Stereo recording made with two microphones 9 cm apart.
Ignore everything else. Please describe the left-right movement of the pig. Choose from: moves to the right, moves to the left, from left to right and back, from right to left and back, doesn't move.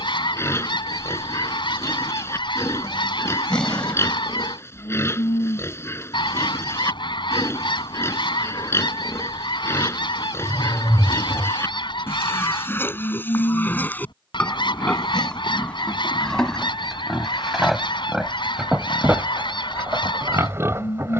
moves to the right.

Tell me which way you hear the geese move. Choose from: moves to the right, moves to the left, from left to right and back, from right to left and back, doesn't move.
doesn't move.